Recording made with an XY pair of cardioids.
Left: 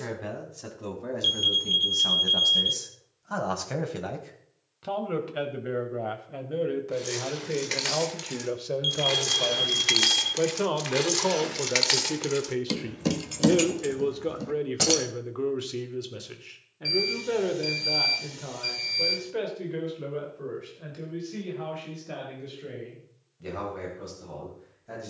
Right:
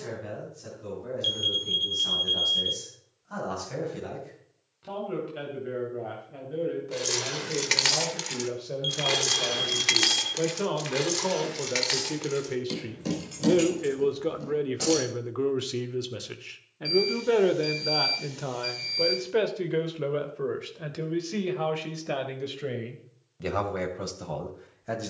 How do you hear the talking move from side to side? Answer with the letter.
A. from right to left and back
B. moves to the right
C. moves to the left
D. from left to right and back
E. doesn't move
B.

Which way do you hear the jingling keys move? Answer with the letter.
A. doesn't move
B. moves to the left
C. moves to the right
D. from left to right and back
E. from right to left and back
B.